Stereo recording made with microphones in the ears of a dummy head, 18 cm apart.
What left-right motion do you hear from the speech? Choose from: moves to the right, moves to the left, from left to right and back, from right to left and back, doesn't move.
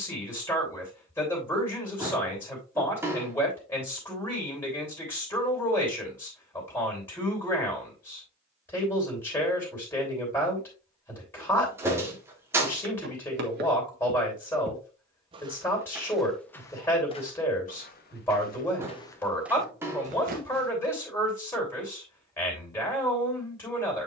doesn't move.